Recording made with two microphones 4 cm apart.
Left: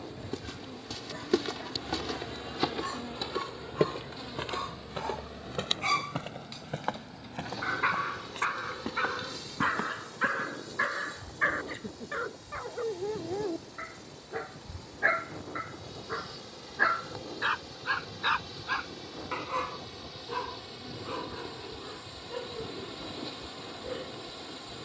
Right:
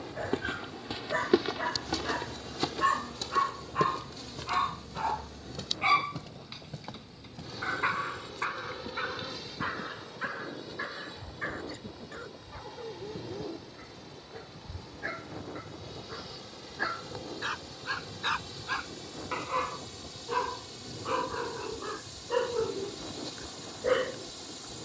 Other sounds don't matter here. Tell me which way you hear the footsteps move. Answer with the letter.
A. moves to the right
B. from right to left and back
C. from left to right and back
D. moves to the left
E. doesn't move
D.